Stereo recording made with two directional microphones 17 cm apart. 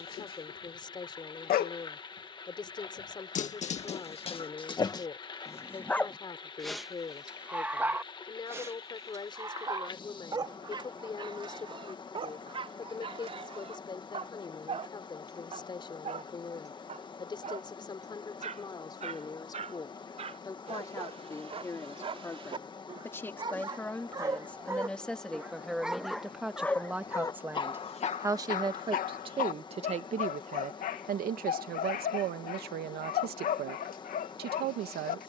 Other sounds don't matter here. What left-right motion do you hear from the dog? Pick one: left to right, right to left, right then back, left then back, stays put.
right then back.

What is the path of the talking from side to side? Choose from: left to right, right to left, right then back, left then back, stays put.
left to right.